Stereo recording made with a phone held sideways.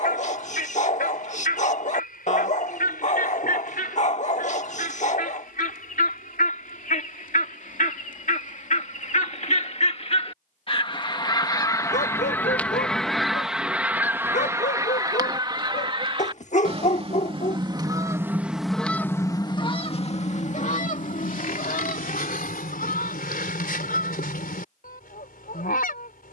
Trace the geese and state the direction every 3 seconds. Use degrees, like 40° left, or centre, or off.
80° left, 70° left, 60° left, 40° left, centre, 30° right, 30° left, 70° left, 80° left.